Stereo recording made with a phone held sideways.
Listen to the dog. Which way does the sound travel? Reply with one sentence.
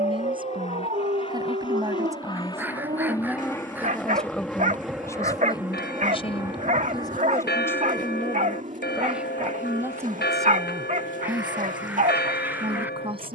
In this clip you hear the dog stay in one place.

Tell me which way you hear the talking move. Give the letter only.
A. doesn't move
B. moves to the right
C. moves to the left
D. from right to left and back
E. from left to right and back
D.